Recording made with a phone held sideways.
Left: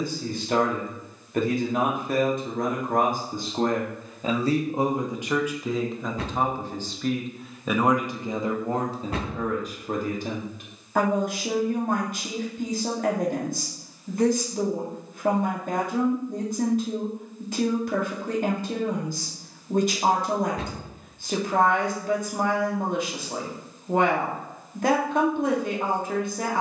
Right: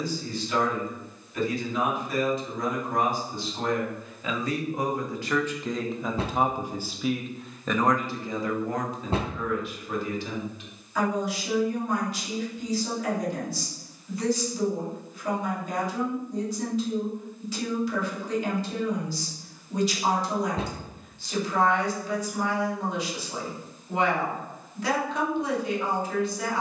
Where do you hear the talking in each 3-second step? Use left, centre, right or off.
left, left, centre, left, left, left, left, left, left.